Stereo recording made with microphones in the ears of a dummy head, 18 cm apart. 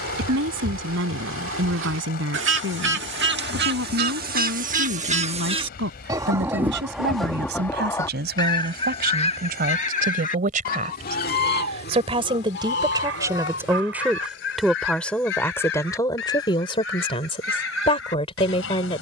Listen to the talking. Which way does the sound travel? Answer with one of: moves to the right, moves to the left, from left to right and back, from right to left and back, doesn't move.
moves to the left.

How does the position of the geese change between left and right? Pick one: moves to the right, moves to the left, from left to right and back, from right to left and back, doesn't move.
moves to the left.